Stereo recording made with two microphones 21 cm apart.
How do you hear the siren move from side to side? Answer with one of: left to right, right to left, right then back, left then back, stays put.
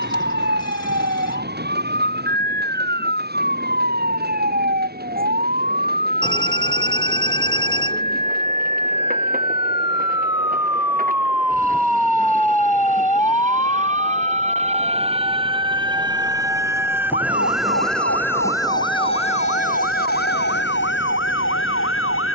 right to left.